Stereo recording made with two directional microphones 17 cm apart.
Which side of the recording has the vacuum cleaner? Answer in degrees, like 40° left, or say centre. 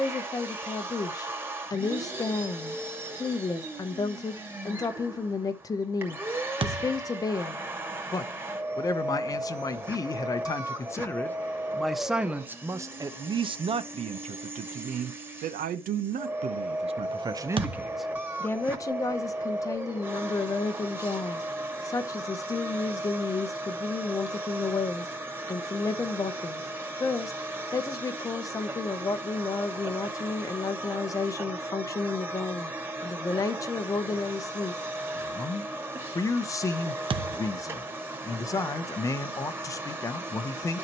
10° right.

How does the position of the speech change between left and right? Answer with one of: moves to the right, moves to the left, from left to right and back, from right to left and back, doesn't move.
from left to right and back.